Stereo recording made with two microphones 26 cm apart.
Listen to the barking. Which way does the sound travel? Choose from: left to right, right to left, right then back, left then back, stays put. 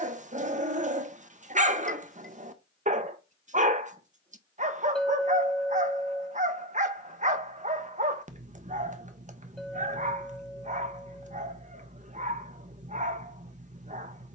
stays put.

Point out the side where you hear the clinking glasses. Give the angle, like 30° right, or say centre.
centre.